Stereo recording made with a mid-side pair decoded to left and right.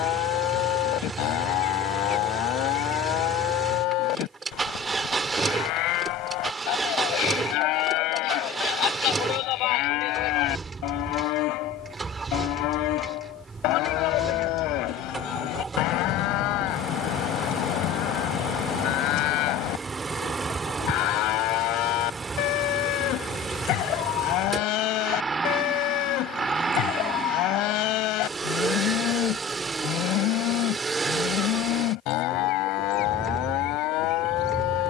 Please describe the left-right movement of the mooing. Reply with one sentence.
In this clip you hear the mooing stay in one place.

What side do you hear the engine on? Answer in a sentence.
In this clip you hear the engine on the right.